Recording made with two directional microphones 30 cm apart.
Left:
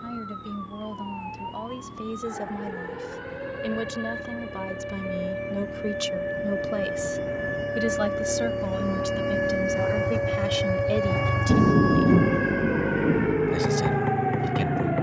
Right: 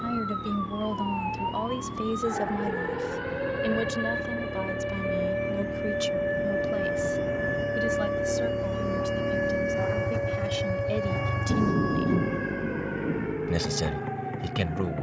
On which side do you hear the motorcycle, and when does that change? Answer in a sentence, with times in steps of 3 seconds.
In this clip you hear the motorcycle on the right from 0 s, in the centre from 9 s and on the left from 12 s.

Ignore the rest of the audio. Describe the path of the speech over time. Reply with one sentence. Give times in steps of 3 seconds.
In this clip you hear the speech on the right from 0 s, in the centre from 3 s, on the left from 6 s and on the right from 12 s.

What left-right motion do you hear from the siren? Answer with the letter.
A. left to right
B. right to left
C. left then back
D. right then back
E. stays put
B.